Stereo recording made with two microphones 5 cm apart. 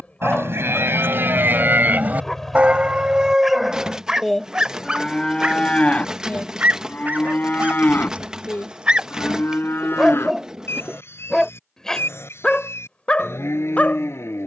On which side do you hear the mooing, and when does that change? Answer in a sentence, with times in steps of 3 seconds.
You can hear the mooing on the right from 0 s, in the centre from 3 s and on the left from 6 s.